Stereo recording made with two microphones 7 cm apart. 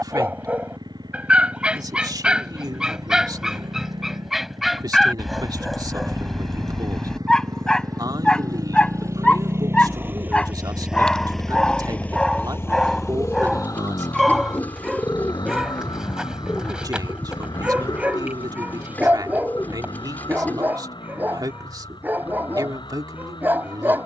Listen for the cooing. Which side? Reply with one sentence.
You can hear the cooing on the left.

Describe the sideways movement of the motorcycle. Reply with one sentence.
In this clip you hear the motorcycle travel towards the left.